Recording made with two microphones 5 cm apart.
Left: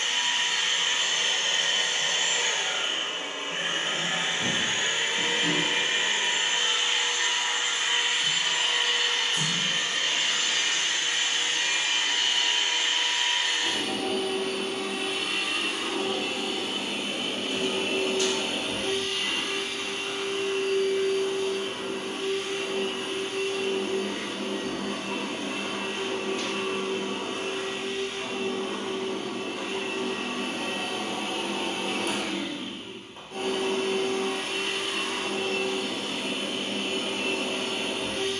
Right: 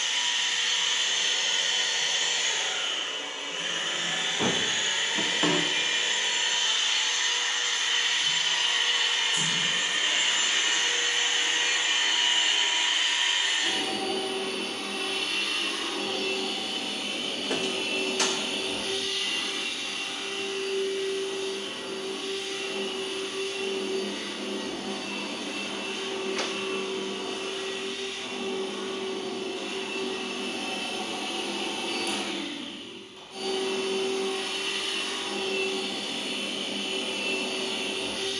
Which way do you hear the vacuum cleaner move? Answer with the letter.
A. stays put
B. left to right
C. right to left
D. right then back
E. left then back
D.